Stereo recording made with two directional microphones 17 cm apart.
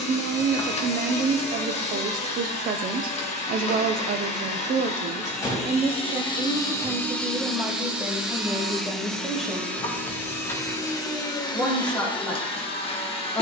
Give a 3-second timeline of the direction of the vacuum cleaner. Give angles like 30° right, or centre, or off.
40° left, 40° left, 10° left, 10° left, 30° left.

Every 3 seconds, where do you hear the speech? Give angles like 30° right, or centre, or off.
50° right, 50° right, 10° right, centre, 10° left.